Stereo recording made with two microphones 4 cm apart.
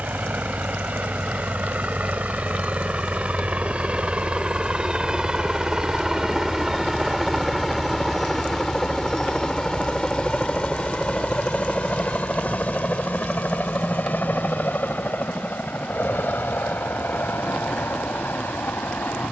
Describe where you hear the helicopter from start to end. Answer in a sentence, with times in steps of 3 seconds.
In this clip you hear the helicopter on the right from 0 s, in the centre from 6 s and on the left from 9 s.